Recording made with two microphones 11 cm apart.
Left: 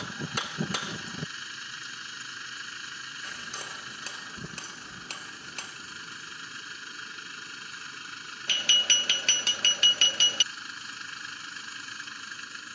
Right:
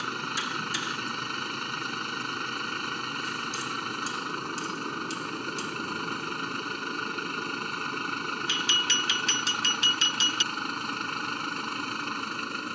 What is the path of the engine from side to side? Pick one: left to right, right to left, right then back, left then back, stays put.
stays put.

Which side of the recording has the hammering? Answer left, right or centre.
left.